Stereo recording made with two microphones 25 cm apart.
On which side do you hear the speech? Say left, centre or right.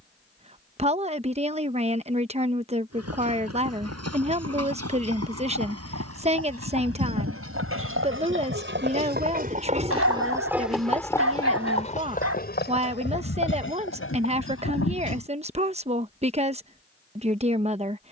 right.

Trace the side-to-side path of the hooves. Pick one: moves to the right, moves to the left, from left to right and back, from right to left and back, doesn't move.
moves to the left.